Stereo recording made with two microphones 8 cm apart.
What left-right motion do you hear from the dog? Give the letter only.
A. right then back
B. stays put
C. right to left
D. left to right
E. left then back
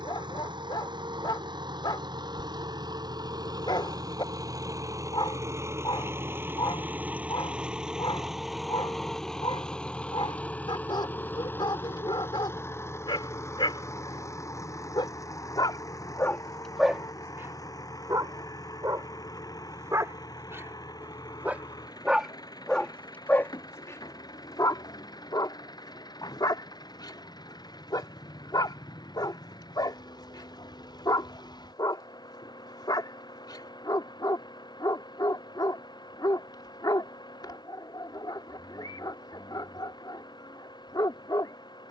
A.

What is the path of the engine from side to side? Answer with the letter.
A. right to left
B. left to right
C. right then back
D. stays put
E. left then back
A.